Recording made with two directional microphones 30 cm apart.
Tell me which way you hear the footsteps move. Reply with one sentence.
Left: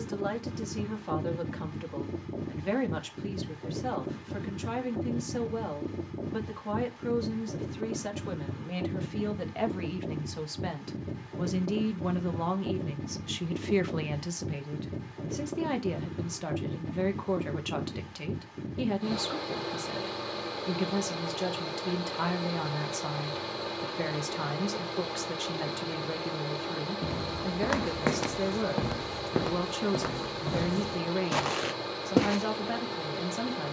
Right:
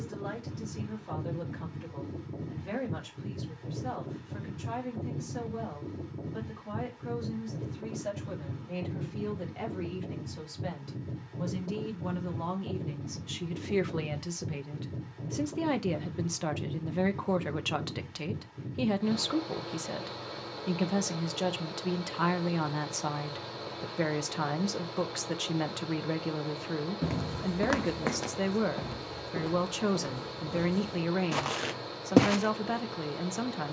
In this clip you hear the footsteps move from right to left and back again.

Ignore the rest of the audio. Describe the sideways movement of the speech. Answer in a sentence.
In this clip you hear the speech move from left to right.